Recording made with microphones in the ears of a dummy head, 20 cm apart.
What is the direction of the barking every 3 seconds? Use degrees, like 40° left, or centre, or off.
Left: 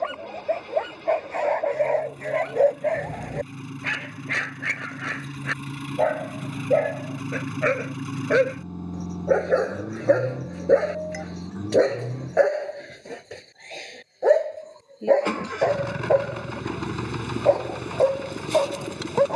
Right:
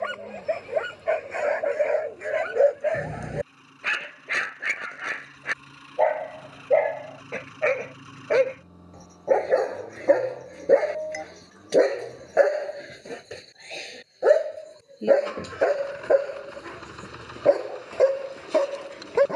20° right, centre, 10° left, 10° left, 10° right, 20° right, 30° right.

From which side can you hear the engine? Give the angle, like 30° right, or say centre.
70° left.